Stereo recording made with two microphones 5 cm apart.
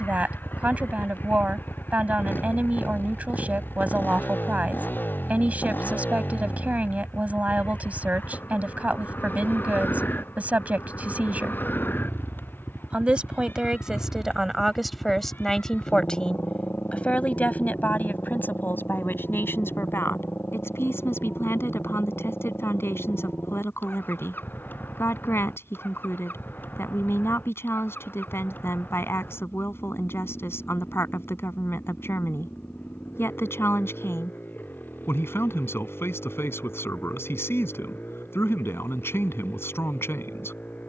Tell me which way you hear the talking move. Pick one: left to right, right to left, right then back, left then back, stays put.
right to left.